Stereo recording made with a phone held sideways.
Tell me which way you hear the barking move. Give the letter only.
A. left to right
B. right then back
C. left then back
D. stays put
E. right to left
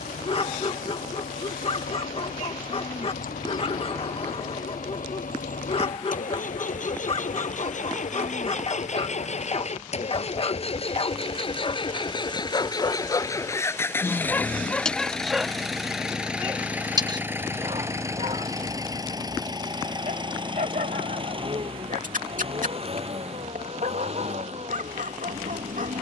A.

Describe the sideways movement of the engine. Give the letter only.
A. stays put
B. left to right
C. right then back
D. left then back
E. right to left
B.